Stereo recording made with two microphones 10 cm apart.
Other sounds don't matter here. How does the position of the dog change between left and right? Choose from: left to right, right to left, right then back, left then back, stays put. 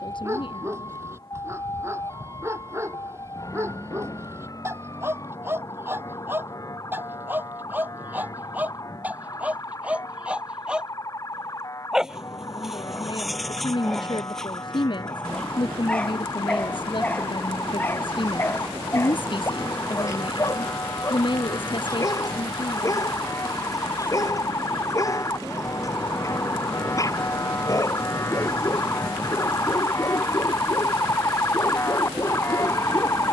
right to left.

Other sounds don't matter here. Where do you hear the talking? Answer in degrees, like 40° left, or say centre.
50° left.